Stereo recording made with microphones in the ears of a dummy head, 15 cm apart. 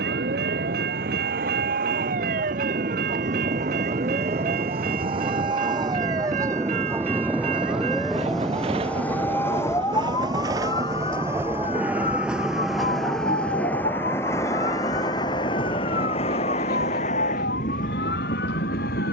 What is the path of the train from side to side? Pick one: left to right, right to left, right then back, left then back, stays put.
right to left.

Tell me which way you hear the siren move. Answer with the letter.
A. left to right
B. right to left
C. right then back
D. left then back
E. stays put
B.